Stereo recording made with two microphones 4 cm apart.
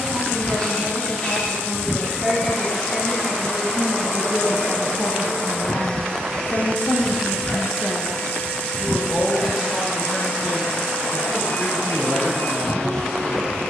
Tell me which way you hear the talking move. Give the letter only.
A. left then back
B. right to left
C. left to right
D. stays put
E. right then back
A.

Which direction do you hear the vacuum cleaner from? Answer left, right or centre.
left.